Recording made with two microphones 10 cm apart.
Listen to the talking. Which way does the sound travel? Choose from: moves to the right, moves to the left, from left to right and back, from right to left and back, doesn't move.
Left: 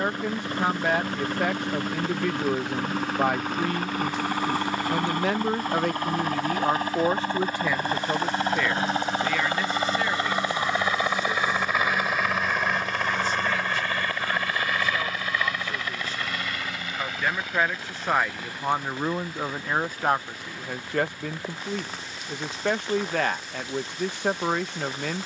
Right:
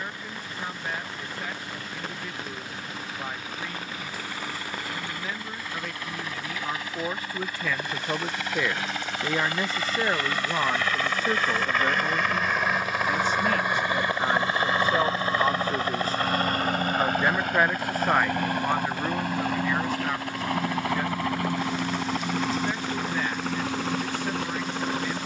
from left to right and back.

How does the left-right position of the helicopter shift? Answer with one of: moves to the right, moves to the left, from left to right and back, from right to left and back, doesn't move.
moves to the right.